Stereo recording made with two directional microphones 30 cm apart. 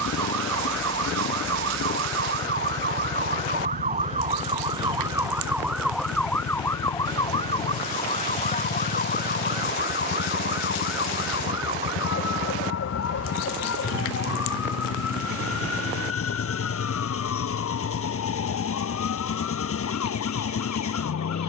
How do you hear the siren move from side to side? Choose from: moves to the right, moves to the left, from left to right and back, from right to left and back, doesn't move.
moves to the left.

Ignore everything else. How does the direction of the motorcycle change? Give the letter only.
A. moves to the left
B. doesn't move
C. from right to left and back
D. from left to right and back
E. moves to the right
B.